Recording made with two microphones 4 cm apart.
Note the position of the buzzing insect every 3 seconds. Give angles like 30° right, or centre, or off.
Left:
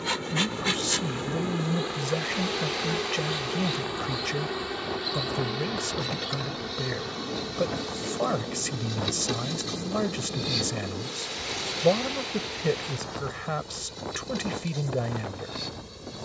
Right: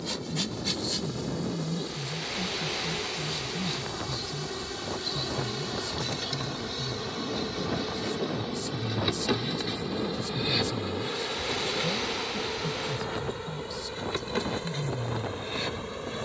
40° left, 20° left, centre, 30° right, 40° right, 50° right.